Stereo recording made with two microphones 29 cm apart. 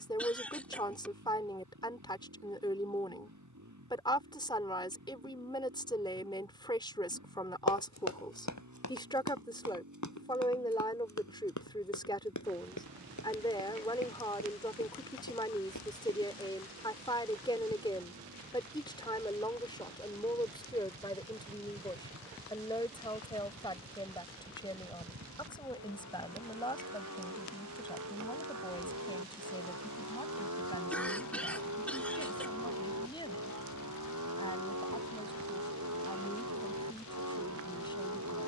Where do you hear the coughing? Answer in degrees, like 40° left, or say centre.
centre.